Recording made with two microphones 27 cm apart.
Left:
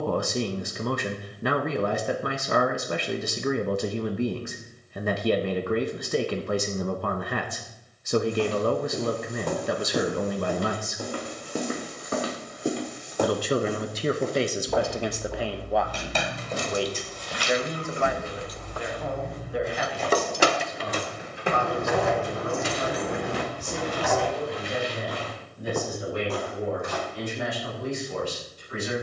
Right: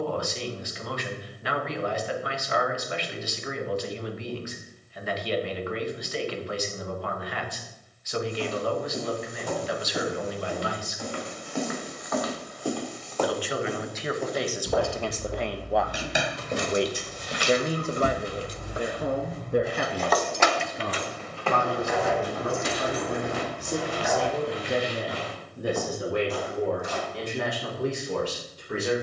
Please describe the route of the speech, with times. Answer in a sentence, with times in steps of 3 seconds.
You can hear the speech on the left from 0 s, in the centre from 15 s and on the right from 18 s.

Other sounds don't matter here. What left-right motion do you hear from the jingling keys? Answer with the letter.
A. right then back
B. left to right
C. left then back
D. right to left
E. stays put
D.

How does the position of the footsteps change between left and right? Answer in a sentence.
In this clip you hear the footsteps go right and come back.